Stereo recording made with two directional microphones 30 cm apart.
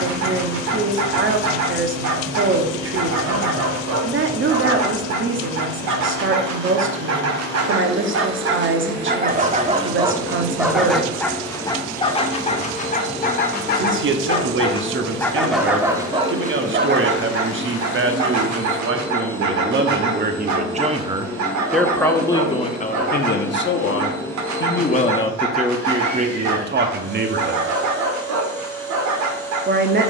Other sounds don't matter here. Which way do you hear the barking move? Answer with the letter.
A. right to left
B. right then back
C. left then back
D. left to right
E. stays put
C.